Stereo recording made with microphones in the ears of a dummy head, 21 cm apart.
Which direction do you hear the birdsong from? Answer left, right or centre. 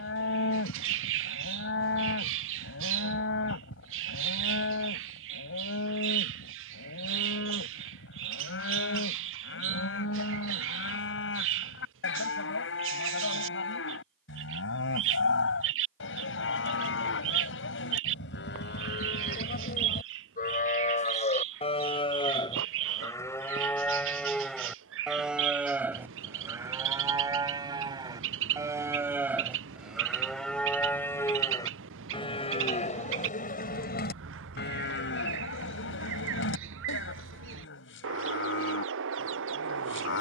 right.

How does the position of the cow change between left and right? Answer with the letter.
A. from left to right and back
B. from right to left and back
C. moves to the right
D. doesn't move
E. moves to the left
A.